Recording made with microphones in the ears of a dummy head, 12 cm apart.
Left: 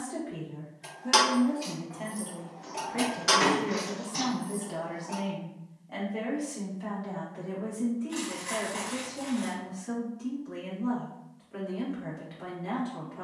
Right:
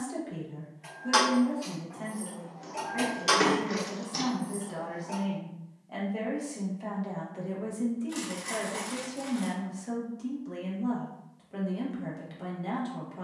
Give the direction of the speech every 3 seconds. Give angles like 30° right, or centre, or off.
centre, 20° left, 20° right, 40° right, 40° right.